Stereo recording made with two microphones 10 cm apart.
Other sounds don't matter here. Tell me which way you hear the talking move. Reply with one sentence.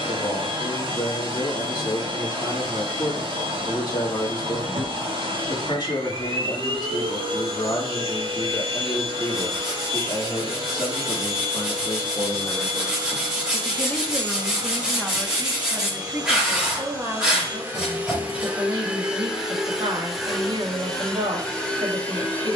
You can hear the talking move to the right.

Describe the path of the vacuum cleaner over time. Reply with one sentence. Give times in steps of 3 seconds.
In this clip you hear the vacuum cleaner on the right from 0 s and in the centre from 18 s.